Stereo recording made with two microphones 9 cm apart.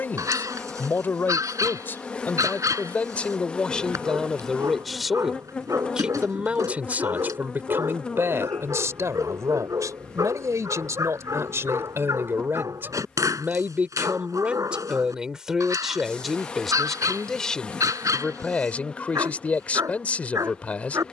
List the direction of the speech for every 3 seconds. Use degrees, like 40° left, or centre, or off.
20° left, centre, 20° right, 30° right, 20° right, centre, 10° left.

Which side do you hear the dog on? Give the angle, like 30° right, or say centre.
40° right.